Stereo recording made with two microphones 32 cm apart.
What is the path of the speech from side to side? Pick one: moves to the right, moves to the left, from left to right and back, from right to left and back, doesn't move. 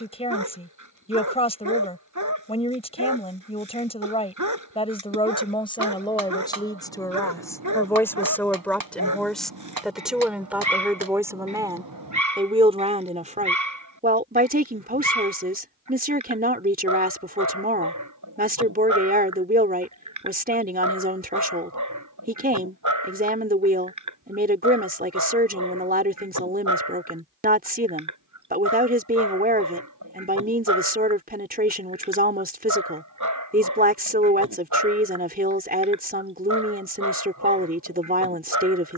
moves to the right.